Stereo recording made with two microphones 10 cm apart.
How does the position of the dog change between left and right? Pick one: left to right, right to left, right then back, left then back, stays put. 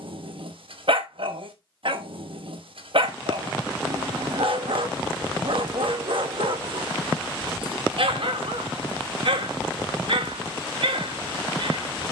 stays put.